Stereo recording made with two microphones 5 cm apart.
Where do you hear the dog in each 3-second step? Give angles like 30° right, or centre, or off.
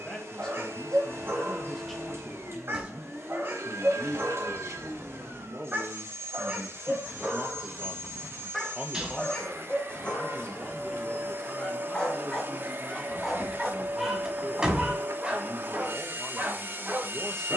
50° right, 40° right, 10° right, 20° left, centre, 30° right.